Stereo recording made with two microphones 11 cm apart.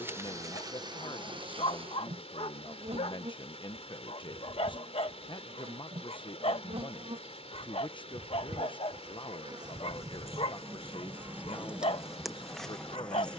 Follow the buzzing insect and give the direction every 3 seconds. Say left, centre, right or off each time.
right, right, right, right, centre.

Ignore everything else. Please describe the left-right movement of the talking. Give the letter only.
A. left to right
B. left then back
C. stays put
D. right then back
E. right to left
C.